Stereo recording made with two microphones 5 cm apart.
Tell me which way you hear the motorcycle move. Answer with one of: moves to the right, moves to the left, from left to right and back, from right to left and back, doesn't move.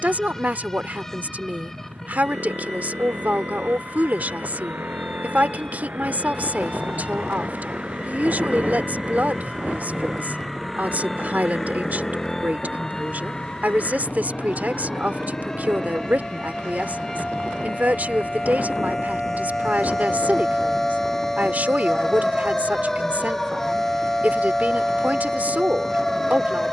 moves to the left.